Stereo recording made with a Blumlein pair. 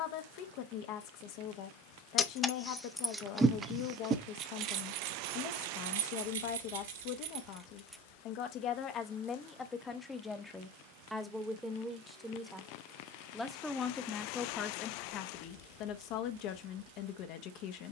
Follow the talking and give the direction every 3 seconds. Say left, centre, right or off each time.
left, left, left, centre, centre, left.